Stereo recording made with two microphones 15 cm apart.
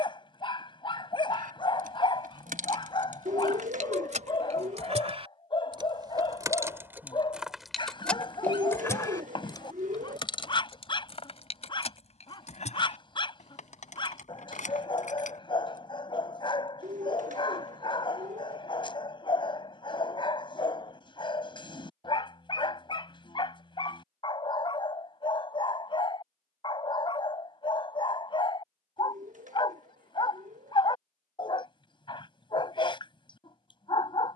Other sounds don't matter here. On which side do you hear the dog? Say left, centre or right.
left.